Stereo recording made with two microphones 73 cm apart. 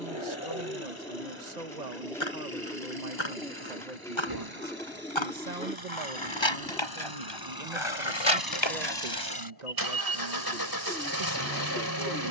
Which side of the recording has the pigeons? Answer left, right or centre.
centre.